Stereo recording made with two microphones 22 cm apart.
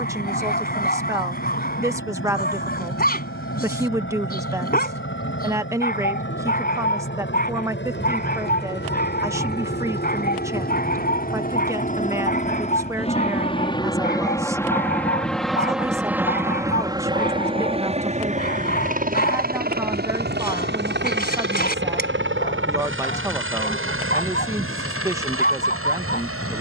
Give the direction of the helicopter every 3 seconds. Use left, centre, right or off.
left, left, left, left, left, centre, right, right, right.